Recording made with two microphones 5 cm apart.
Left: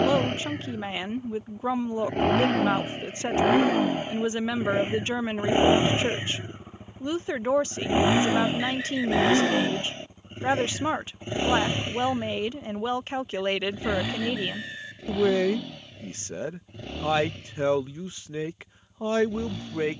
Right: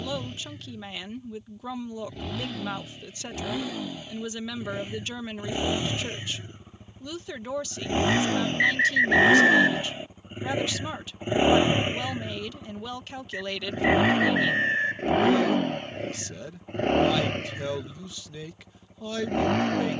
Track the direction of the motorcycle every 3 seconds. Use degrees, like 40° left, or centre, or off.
60° left, 40° left, 20° left, 10° right, 40° right, 50° right, 60° right.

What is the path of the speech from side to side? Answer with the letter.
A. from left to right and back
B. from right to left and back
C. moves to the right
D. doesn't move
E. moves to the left
D.